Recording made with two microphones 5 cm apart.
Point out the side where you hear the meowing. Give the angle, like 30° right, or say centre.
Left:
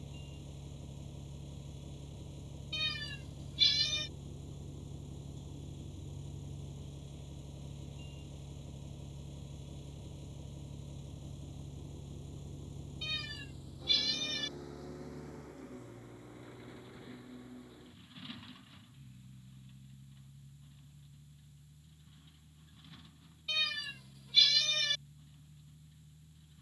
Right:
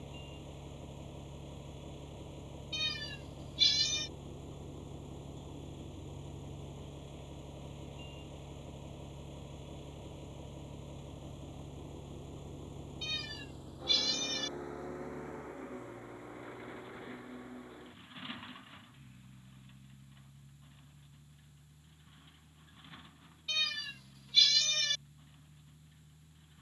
10° left.